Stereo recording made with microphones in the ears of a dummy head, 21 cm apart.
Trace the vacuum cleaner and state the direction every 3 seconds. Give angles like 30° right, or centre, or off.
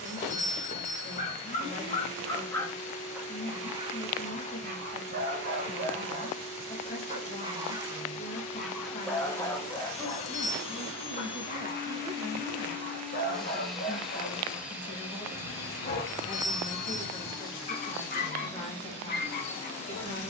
30° left, 30° left, 30° left, 30° left, centre, centre, 30° left.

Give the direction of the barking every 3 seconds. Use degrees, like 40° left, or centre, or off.
20° left, 30° right, 20° right, 20° left, 40° left, 40° left, 40° left.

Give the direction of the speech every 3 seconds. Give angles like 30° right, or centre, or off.
30° left, 30° left, 30° left, 10° left, 10° right, 20° left, 30° left.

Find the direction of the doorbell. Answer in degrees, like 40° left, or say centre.
30° left.